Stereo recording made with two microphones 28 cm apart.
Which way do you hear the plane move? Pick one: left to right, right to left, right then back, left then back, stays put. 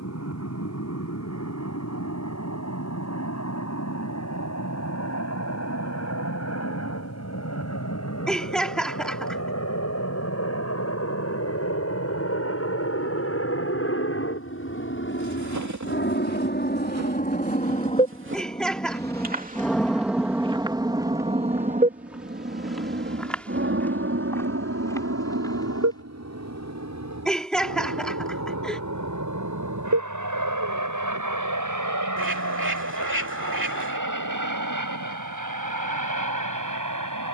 left to right.